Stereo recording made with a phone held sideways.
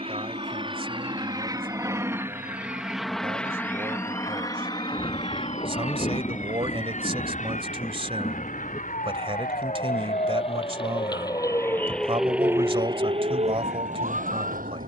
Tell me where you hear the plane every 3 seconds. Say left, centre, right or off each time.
right, left, left, left, left.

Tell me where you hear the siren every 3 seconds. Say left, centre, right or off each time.
left, left, left, left, right.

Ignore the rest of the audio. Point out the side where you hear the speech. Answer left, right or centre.
right.